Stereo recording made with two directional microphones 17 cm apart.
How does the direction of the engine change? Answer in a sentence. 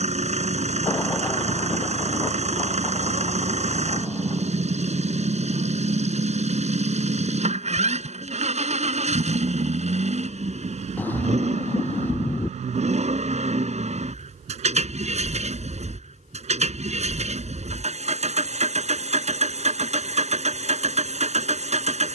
In this clip you hear the engine stay in one place.